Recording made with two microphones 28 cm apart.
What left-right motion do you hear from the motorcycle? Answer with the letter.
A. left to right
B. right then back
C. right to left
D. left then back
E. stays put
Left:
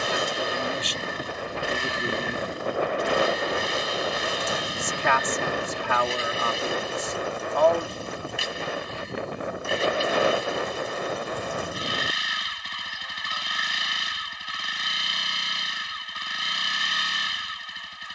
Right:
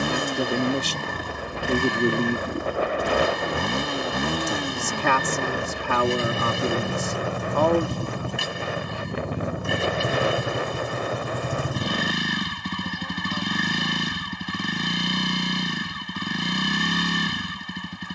E.